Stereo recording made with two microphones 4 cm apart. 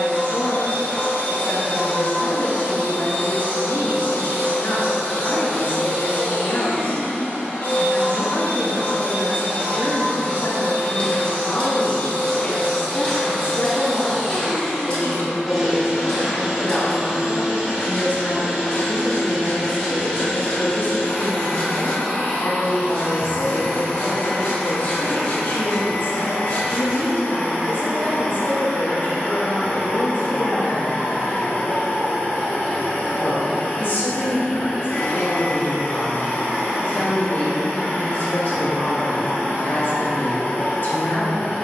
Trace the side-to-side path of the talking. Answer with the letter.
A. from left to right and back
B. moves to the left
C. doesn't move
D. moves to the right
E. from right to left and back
C.